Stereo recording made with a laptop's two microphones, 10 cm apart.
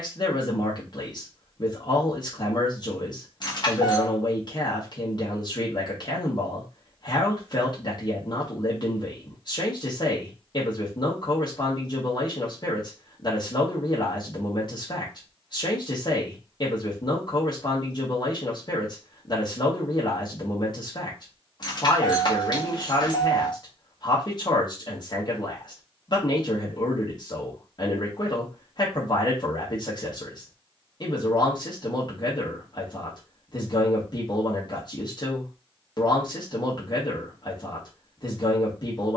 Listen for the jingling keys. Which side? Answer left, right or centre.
left.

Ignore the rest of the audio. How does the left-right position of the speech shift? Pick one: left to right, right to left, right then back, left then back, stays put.
stays put.